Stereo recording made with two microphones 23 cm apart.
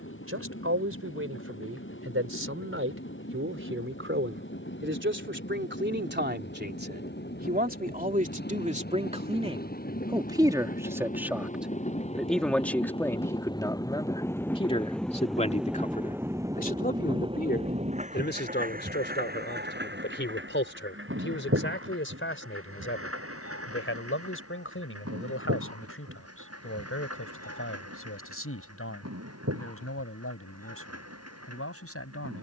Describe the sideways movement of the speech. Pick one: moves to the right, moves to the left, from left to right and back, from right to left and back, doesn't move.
moves to the left.